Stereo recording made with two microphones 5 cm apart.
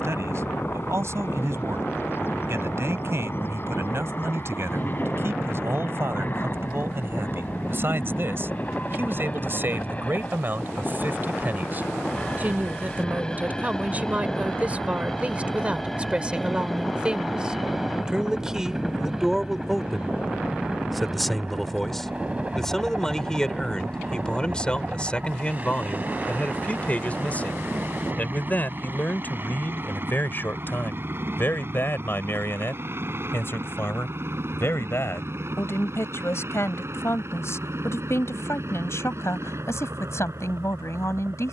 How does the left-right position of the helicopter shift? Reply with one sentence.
You can hear the helicopter travel towards the right.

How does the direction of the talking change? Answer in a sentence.
In this clip you hear the talking move from right to left.